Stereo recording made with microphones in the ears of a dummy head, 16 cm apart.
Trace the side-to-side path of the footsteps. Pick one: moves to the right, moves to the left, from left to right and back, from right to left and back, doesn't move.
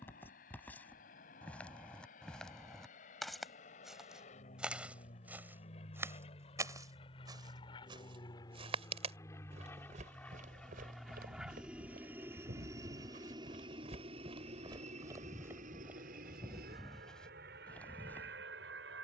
from left to right and back.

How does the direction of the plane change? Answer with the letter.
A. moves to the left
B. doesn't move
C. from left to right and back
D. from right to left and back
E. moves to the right
E.